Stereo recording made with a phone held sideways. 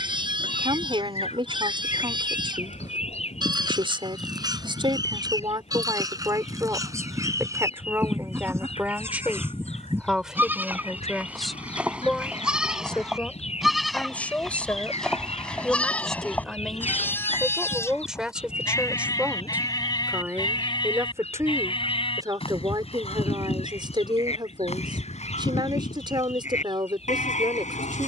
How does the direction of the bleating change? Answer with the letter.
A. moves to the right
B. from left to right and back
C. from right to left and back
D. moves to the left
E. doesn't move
D.